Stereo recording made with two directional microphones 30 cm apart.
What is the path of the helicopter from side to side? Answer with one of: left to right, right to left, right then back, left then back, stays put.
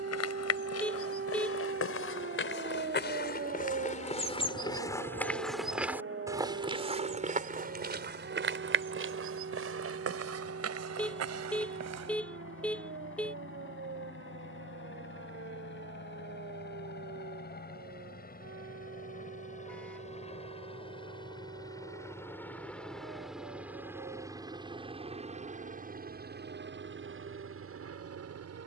left to right.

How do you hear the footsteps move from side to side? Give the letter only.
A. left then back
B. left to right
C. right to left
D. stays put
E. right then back
B.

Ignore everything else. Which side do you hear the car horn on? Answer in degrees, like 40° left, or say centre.
centre.